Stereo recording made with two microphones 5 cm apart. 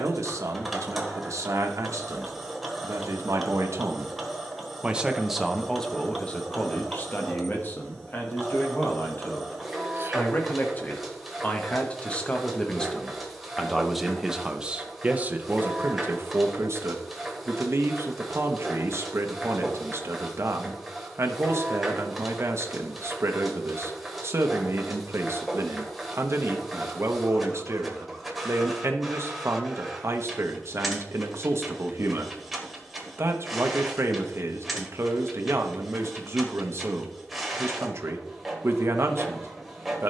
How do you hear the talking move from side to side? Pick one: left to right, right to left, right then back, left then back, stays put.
left then back.